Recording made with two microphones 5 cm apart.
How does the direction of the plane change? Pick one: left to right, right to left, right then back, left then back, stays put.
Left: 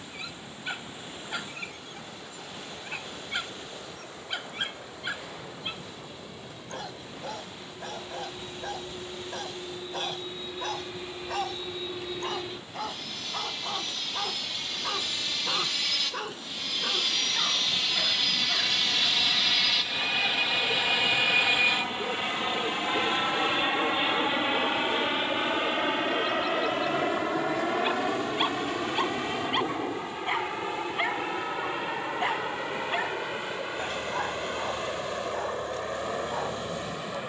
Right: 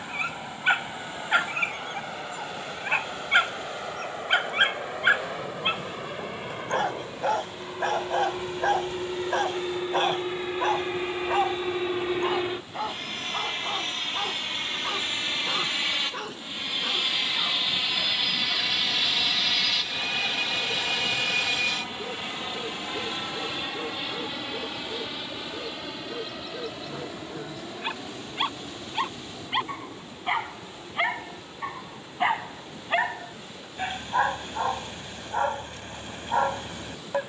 right to left.